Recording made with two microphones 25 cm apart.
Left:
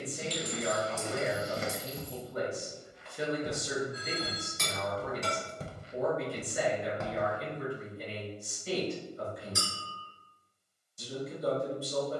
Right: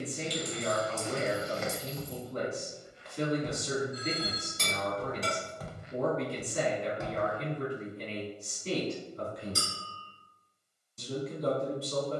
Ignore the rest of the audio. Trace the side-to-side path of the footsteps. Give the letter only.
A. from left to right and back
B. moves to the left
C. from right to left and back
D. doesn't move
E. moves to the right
A.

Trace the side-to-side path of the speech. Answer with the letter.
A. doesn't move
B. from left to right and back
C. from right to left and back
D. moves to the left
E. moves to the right
A.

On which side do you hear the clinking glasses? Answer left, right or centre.
right.